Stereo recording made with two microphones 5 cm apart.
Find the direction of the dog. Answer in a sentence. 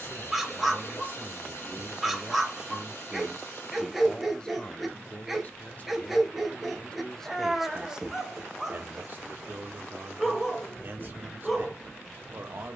In this clip you hear the dog in the centre.